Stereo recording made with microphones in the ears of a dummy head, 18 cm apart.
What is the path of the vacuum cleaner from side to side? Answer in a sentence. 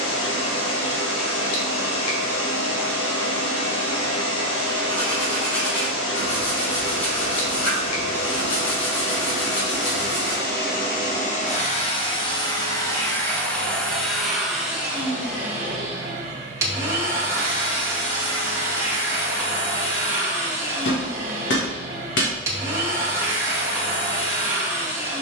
In this clip you hear the vacuum cleaner move to the right.